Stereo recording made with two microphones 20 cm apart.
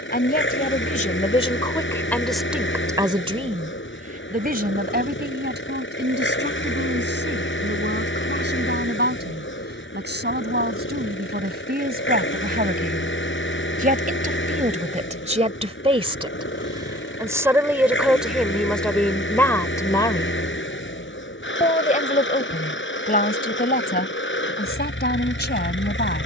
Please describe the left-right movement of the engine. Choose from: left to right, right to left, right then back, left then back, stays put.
stays put.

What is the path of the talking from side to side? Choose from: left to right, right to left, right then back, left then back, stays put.
right then back.